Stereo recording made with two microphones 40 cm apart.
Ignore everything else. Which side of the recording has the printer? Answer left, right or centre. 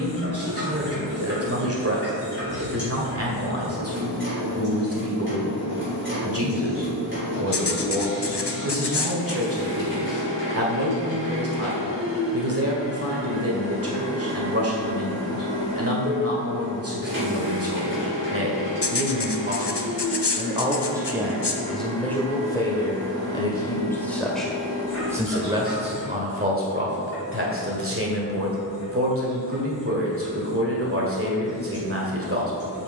right.